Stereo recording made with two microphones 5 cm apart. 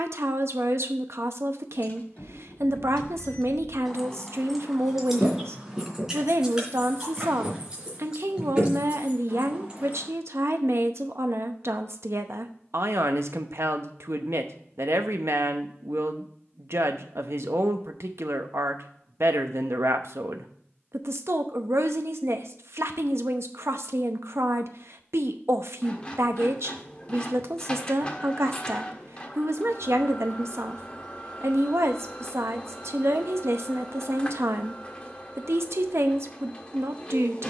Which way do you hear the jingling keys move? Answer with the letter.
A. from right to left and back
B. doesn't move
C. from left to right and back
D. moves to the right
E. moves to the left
D.